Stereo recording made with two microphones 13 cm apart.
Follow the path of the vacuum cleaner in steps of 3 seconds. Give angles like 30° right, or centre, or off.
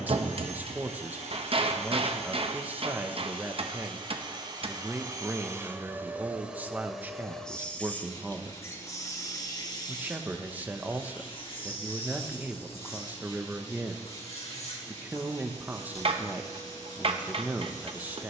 60° right, 30° right, 10° left, 40° left, 50° left, 60° left.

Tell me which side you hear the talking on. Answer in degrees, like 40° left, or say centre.
10° right.